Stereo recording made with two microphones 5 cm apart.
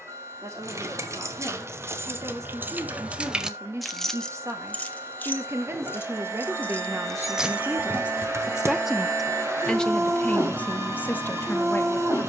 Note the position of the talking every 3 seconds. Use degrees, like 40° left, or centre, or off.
70° right, 60° right, 40° right, 30° left.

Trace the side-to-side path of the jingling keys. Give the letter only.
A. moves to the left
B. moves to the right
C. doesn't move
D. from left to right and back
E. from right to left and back
E.